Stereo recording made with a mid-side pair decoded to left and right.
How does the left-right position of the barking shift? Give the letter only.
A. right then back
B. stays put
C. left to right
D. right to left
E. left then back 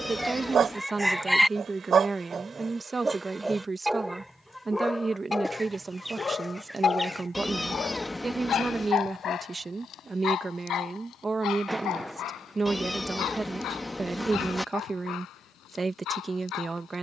D.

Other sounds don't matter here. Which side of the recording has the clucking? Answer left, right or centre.
centre.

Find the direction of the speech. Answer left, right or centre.
right.